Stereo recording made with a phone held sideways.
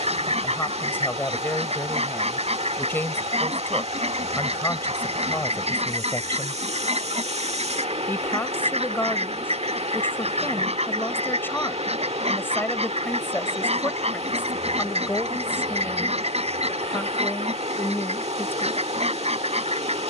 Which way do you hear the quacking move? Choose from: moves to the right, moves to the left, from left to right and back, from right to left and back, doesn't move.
doesn't move.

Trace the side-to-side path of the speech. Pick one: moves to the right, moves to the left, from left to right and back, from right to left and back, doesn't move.
doesn't move.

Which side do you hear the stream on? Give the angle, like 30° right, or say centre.
50° right.